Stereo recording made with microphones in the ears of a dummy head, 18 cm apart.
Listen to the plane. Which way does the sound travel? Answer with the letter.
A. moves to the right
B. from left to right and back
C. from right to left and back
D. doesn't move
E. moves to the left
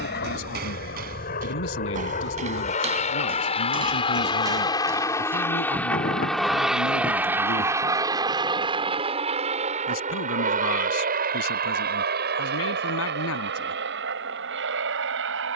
A.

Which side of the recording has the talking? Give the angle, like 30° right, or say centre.
80° left.